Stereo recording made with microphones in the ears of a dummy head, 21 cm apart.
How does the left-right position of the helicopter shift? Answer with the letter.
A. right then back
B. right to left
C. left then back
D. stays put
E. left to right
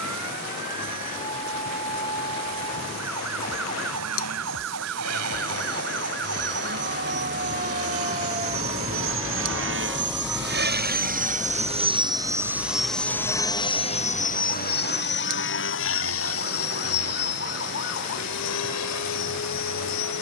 B.